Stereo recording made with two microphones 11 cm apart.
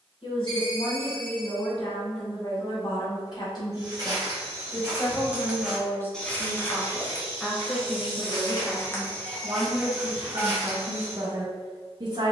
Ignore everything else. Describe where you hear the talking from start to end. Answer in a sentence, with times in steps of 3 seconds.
In this clip you hear the talking on the left from 0 s, in the centre from 6 s and on the right from 9 s.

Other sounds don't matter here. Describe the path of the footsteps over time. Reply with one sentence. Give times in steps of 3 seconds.
In this clip you hear the footsteps not at all from 0 s, on the right from 3 s, on the left from 6 s and in the centre from 9 s.